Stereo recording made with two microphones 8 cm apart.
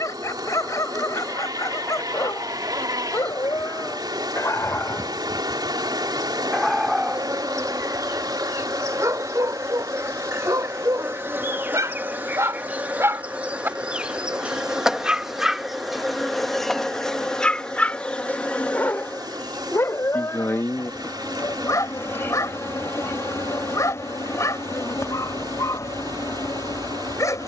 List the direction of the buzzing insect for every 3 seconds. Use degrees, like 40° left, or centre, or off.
60° right, 60° right, 50° right, 40° right, 20° right, centre, 20° left, 40° left, 50° left.